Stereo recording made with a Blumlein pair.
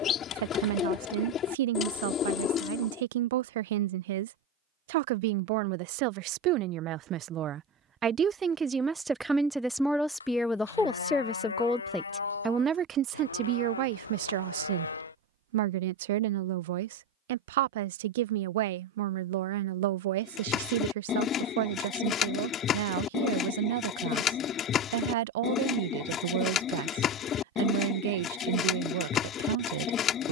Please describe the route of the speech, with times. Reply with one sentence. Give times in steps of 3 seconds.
In this clip you hear the speech on the right from 0 s, in the centre from 9 s and on the right from 12 s.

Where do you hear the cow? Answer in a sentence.
In this clip you hear the cow on the left.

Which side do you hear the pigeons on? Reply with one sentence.
You can hear the pigeons on the left.